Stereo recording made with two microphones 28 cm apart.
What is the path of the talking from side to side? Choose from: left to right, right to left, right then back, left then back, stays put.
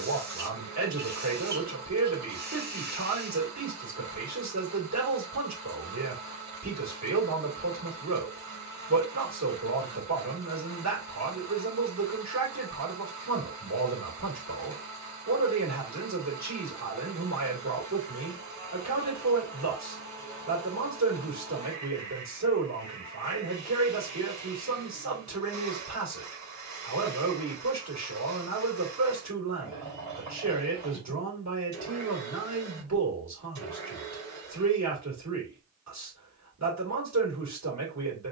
stays put.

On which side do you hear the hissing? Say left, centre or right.
right.